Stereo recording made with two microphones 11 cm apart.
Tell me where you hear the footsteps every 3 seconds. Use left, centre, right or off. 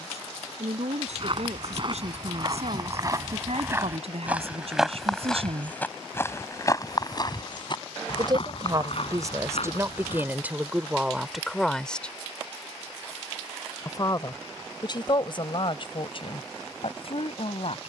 right, centre, left, left, off, off.